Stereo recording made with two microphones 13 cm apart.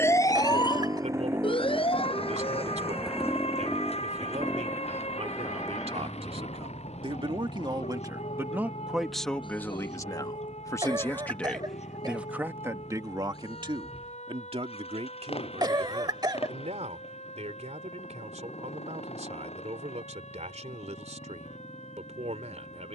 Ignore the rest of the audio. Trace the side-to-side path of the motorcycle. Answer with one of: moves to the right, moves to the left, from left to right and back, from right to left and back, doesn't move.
moves to the left.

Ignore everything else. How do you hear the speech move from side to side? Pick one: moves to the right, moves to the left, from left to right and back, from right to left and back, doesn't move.
from right to left and back.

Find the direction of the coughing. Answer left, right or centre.
right.